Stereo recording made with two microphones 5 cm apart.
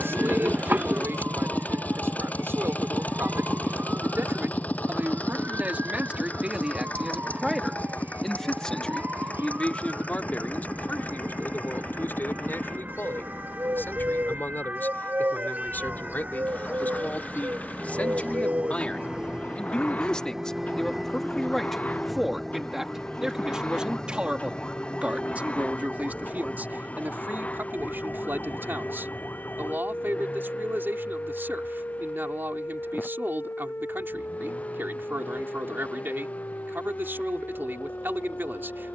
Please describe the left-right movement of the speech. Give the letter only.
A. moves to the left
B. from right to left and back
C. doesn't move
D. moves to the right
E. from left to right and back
B.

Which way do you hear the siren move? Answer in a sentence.
In this clip you hear the siren move to the left.